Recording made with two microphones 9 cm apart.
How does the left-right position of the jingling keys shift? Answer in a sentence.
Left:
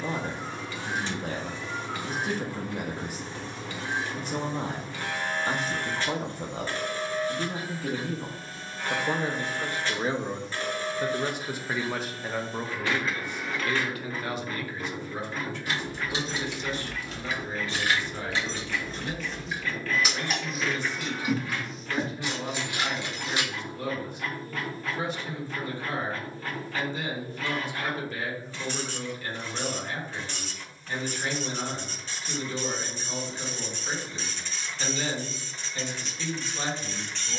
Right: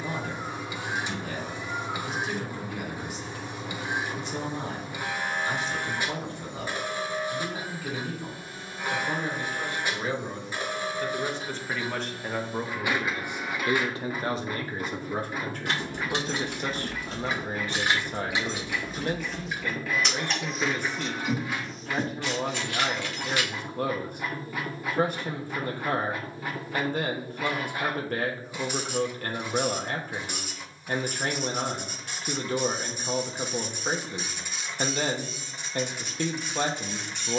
In this clip you hear the jingling keys move from right to left.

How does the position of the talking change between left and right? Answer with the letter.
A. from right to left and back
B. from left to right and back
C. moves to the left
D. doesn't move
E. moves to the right
E.